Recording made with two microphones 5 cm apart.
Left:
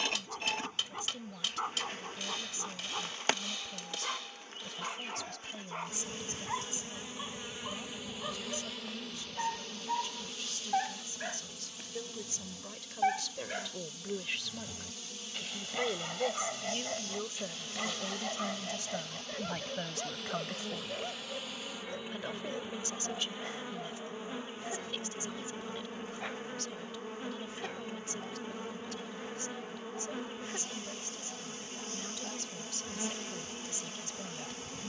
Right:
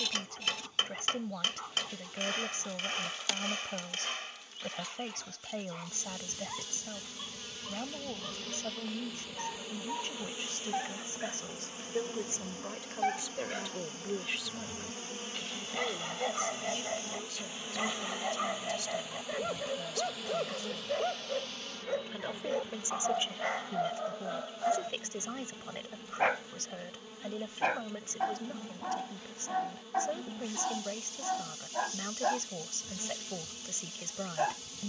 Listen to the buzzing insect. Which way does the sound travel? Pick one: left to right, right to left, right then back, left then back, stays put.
right then back.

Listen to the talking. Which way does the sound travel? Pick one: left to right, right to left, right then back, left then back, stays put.
left then back.